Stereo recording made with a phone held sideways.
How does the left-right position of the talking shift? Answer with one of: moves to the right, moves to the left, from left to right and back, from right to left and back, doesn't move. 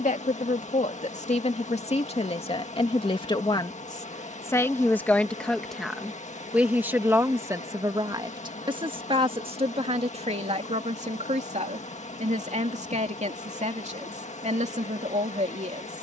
moves to the right.